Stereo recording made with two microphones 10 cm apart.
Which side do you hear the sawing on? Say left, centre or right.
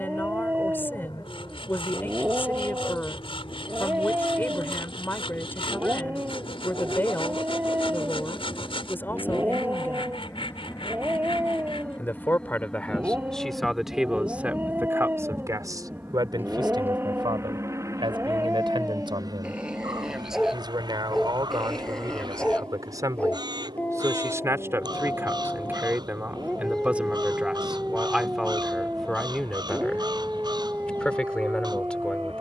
left.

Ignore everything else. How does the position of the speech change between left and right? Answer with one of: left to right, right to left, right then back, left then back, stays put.
right then back.